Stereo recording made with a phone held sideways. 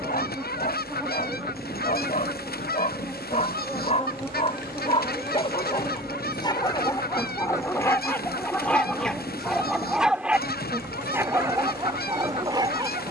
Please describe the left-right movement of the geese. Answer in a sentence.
In this clip you hear the geese stay in one place.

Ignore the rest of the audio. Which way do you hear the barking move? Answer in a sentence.
In this clip you hear the barking move to the right.